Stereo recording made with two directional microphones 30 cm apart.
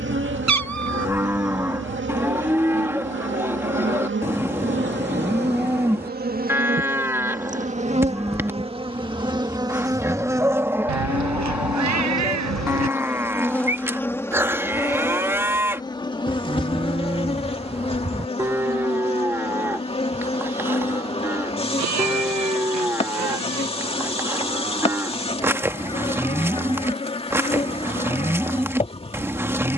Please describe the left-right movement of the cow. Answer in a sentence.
In this clip you hear the cow stay in one place.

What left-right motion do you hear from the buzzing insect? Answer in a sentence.
You can hear the buzzing insect move to the left.